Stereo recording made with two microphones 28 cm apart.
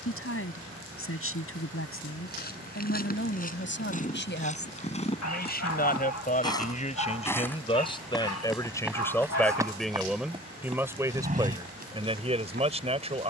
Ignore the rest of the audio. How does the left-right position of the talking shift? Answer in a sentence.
You can hear the talking go from the left side to the right.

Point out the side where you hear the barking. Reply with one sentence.
In this clip you hear the barking on the left.